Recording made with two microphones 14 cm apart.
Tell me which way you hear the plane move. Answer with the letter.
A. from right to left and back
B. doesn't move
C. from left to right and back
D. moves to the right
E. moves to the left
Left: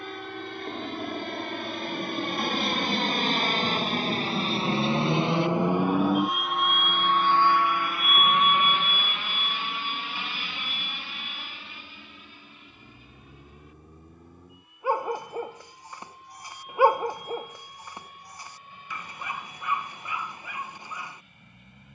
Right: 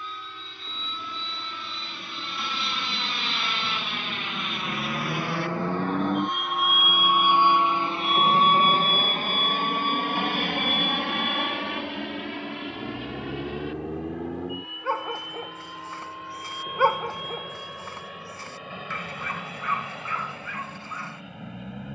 D.